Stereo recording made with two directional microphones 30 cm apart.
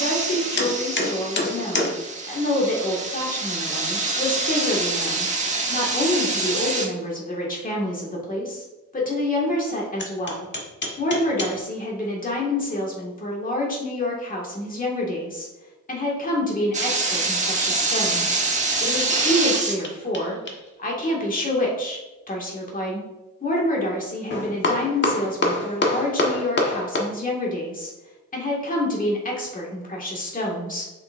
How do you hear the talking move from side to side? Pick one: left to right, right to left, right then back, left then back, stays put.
stays put.